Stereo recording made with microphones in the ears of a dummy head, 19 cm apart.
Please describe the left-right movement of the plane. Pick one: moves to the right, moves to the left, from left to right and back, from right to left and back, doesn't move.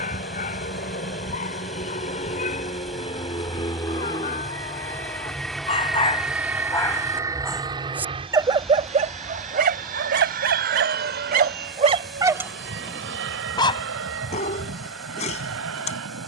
moves to the right.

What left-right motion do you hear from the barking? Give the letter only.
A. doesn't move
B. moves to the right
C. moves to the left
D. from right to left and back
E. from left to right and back
E.